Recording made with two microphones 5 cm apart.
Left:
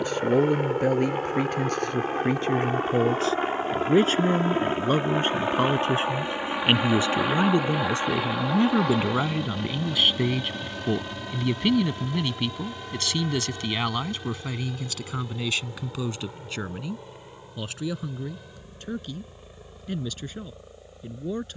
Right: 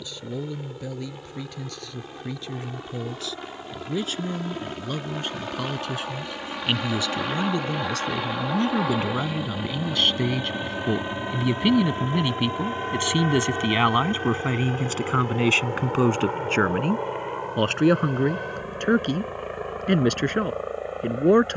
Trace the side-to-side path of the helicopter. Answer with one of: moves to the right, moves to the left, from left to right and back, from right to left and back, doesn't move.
moves to the right.